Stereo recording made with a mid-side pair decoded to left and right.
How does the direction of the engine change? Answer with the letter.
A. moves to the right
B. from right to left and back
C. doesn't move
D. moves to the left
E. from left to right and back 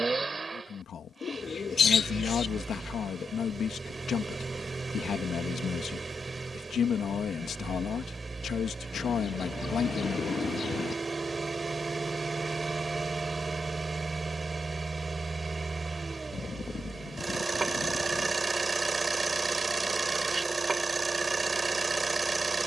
C.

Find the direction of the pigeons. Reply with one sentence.
In this clip you hear the pigeons on the left.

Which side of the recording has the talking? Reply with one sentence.
In this clip you hear the talking on the left.